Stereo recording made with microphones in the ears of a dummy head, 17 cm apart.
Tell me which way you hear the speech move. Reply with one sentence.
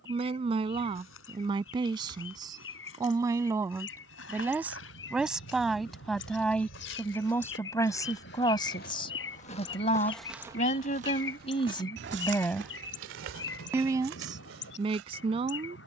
You can hear the speech move from right to left and back again.